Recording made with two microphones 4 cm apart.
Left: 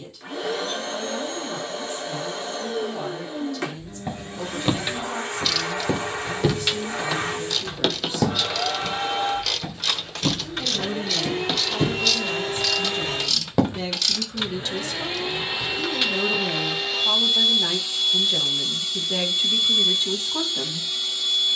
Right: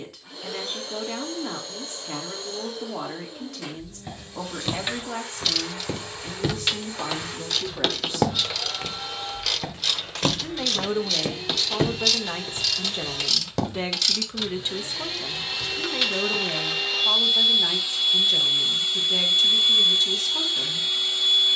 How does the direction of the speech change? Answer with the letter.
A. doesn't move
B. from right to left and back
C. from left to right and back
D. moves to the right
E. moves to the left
E.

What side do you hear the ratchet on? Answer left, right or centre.
centre.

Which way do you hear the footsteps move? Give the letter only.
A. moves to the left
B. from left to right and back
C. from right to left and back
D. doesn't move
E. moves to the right
B.